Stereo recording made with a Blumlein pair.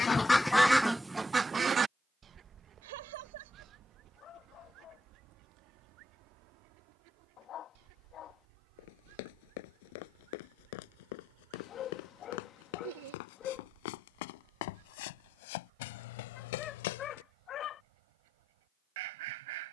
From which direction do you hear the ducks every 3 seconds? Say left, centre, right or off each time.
centre, right, right, right, right, right, right.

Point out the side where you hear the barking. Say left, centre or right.
left.